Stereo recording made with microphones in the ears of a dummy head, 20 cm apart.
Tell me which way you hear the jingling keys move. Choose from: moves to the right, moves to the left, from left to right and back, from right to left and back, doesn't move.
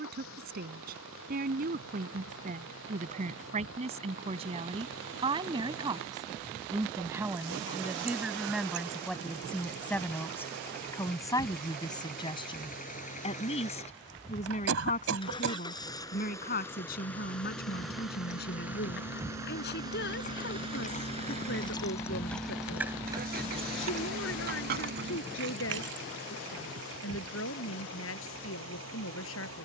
moves to the right.